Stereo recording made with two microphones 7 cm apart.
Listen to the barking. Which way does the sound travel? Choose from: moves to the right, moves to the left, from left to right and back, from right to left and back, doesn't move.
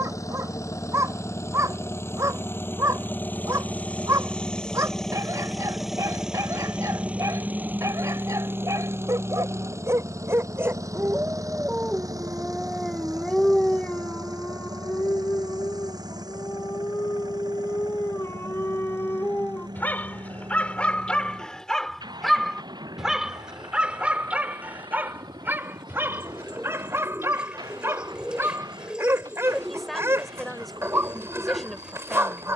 from right to left and back.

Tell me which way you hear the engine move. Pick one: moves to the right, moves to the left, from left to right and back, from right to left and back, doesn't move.
moves to the right.